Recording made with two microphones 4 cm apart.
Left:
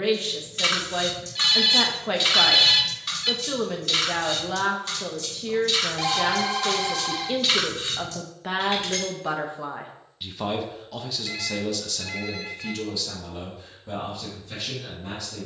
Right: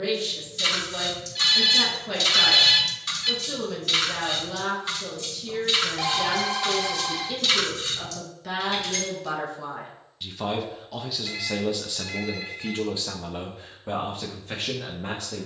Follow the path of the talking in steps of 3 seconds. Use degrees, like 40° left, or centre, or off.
40° left, 40° left, 40° left, centre, 40° right.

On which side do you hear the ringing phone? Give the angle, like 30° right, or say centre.
centre.